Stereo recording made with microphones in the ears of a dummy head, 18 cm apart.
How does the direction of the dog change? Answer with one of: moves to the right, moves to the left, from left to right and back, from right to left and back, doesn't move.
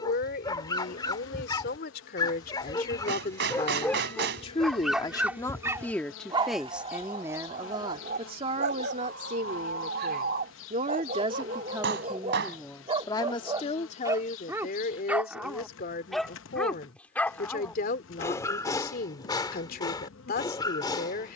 from left to right and back.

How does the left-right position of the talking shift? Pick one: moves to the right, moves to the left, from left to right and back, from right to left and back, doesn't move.
from left to right and back.